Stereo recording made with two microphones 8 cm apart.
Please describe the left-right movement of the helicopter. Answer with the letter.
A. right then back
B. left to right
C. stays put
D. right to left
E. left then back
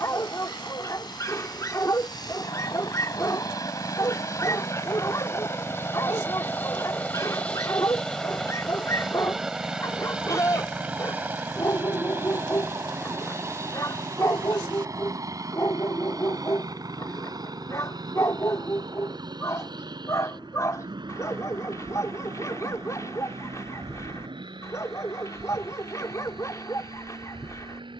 B.